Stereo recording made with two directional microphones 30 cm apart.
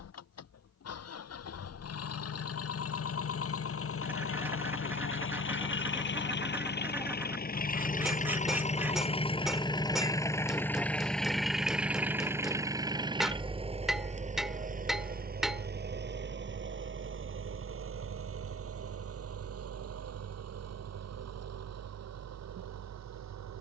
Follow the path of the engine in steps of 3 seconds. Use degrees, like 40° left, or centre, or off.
50° left, 50° left, 30° left, 10° left, 20° right, 40° right, 50° right, 60° right.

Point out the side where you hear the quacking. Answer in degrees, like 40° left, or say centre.
10° right.